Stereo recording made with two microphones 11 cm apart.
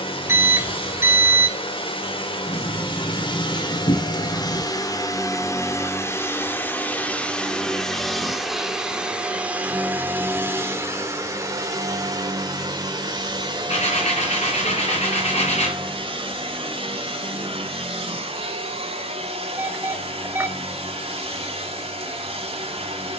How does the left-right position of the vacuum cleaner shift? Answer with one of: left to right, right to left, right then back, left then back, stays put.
left to right.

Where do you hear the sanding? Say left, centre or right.
left.